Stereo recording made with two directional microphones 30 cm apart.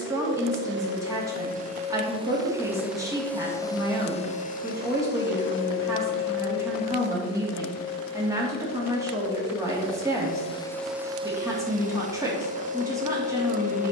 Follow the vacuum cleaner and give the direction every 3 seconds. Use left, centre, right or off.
right, left, left, centre, right.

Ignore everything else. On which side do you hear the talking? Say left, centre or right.
centre.